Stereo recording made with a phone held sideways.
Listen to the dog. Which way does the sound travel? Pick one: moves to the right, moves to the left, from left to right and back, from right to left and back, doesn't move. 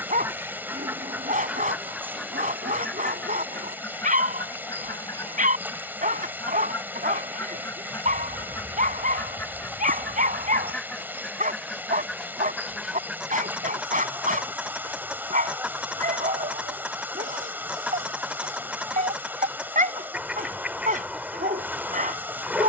doesn't move.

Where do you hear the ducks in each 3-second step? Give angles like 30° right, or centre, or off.
10° right, 20° left, 20° left, 10° left, 10° right, 10° right, 10° right, 10° right.